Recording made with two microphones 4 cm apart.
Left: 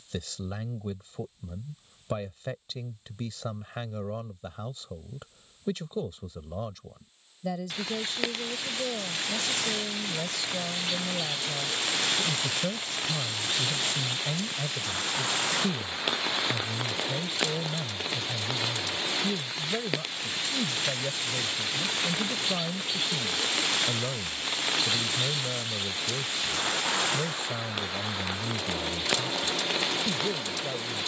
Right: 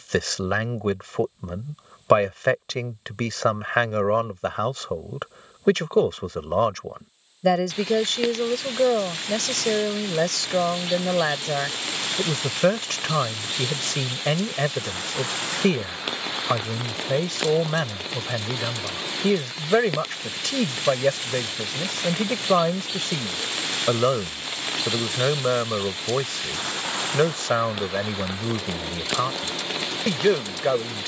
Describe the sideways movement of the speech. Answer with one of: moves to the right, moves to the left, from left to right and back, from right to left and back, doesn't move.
doesn't move.